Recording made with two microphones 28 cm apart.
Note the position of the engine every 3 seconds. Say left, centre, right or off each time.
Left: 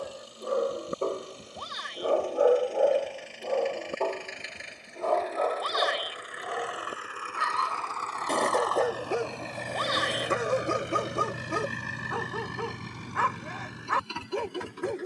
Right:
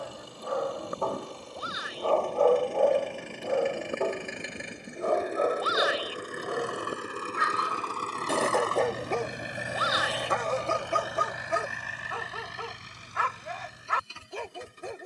right, right, right, centre, left.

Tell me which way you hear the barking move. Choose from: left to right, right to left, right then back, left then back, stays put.
right then back.